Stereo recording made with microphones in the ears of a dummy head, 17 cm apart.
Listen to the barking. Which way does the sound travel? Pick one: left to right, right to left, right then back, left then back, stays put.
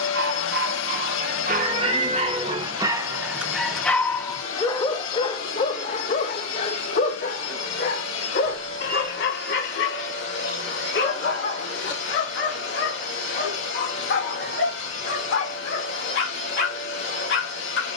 right to left.